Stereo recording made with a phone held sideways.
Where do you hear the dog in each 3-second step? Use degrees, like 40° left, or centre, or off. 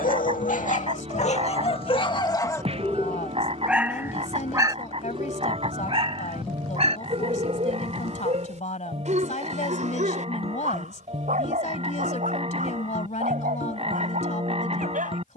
40° left, 20° right, 50° right, 60° right, 60° right.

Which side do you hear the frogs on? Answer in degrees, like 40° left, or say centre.
40° right.